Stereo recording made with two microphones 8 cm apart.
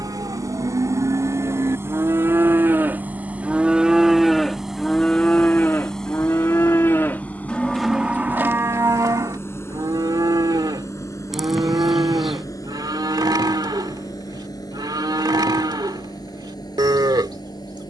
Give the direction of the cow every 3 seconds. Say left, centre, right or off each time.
right, centre, centre, right, right, right.